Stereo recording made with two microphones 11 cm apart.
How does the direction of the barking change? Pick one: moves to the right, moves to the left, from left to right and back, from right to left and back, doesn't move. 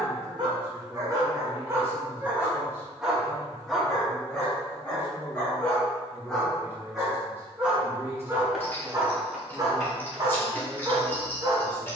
from right to left and back.